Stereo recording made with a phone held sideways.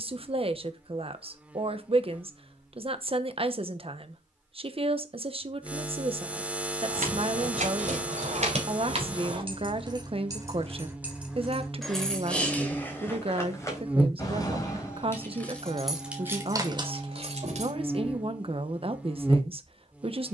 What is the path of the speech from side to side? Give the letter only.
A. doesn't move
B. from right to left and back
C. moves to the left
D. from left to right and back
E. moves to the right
A.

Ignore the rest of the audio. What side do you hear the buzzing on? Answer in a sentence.
In this clip you hear the buzzing in the centre.